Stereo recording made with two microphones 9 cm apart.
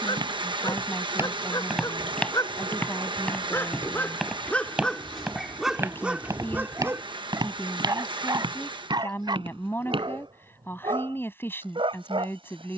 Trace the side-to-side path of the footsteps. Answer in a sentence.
You can hear the footsteps go left and come back.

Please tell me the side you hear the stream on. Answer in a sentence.
In this clip you hear the stream on the right.